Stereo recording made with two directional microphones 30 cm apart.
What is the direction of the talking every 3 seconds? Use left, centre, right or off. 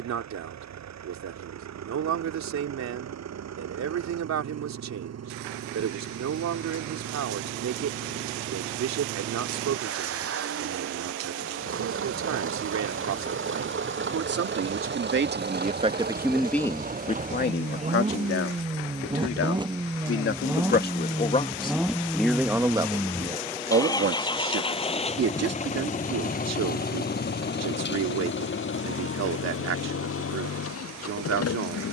right, right, right, right, right, centre, left, centre, right, right, right.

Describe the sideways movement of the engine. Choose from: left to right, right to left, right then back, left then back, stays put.
right to left.